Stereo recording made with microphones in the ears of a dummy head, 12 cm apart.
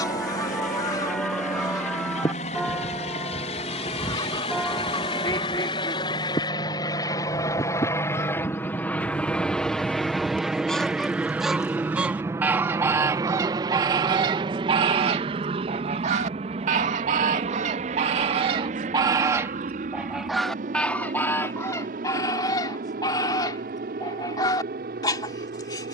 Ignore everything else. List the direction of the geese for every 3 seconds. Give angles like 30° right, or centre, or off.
30° left, 30° left, 20° left, 10° left, 30° right, 50° right, 20° right, 20° left, 30° left.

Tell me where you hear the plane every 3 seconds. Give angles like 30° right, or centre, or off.
60° left, 40° left, 20° left, centre, 30° right, 40° right, 50° right, 60° right, 60° right.